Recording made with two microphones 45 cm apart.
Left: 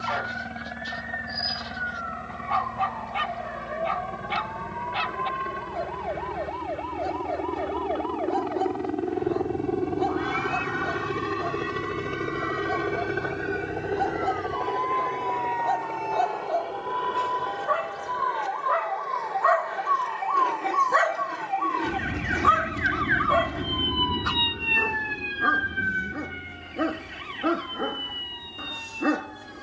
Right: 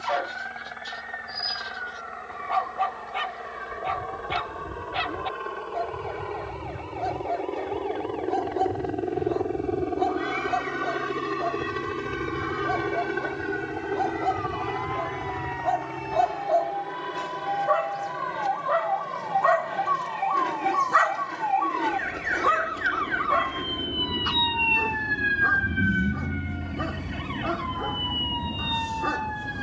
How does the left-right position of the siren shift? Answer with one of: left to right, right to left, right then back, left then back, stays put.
left to right.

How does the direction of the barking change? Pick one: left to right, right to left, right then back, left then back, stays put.
right to left.